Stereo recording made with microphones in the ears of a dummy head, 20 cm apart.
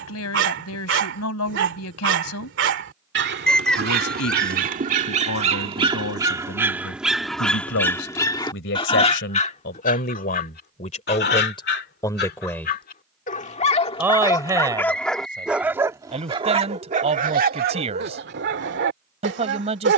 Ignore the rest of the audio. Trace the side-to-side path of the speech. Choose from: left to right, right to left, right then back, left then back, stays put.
left to right.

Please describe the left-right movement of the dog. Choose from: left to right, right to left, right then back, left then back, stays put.
left then back.